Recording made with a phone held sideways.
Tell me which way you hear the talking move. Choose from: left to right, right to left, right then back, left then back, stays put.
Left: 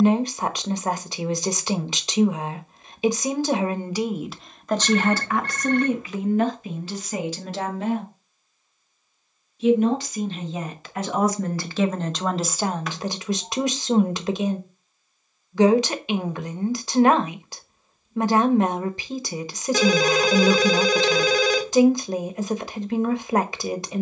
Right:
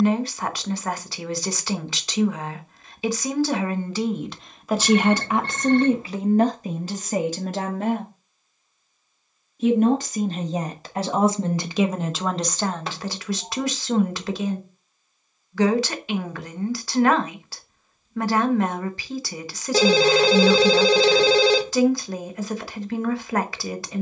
right then back.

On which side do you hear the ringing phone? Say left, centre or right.
right.